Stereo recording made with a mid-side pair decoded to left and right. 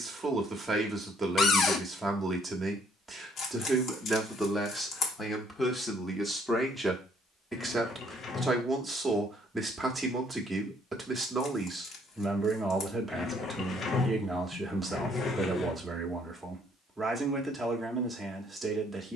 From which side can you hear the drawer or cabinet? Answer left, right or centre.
left.